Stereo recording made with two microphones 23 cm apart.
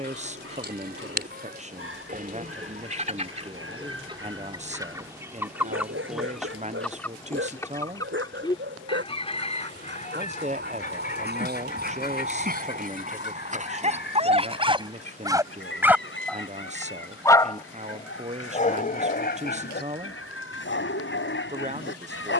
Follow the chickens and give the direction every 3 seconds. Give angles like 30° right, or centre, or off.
40° right, 20° right, 10° left, 30° left, 50° left, 60° left, 60° left, 70° left.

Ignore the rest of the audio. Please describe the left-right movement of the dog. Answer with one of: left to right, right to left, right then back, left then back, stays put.
right to left.